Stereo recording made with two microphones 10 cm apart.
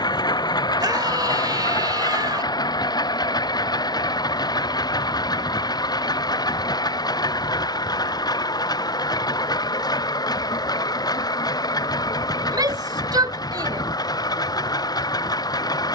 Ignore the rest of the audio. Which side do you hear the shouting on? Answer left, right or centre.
right.